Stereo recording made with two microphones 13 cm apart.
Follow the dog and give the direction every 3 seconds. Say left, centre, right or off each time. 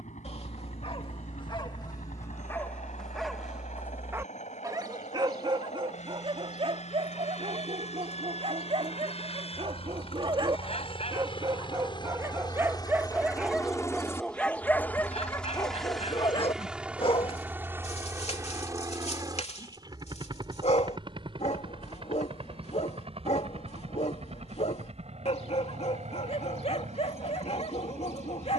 left, right, right, right, centre, left, left, left, left, left.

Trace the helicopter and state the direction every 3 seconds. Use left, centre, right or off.
left, left, left, left, left, centre, right, right, right, right.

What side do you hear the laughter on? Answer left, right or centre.
left.